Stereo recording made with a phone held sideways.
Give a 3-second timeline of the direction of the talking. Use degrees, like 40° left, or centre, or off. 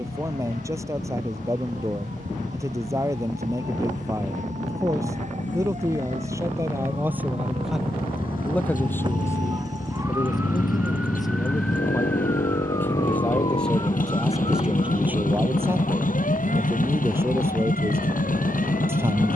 20° right, 20° right, 10° right, 20° left, centre, 10° right, 20° right.